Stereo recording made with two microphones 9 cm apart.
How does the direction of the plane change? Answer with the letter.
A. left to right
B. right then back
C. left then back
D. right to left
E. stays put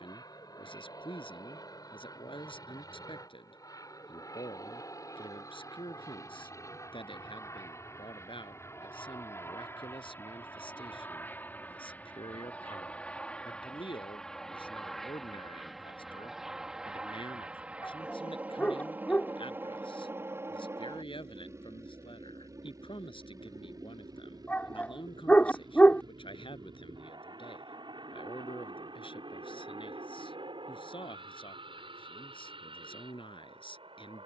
A.